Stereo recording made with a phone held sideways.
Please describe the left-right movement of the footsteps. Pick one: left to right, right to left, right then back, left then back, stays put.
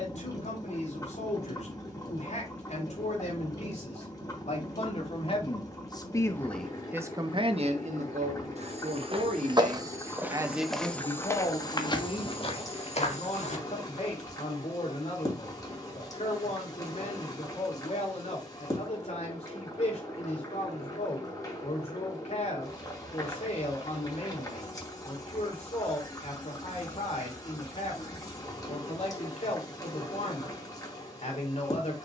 right to left.